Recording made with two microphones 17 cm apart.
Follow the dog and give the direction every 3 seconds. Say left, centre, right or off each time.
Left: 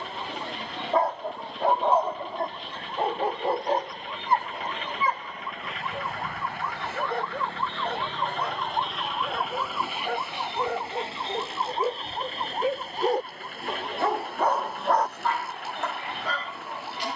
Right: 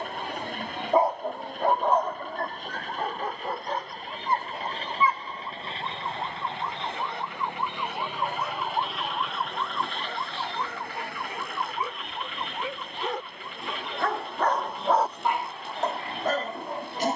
centre, left, left, left, left, right.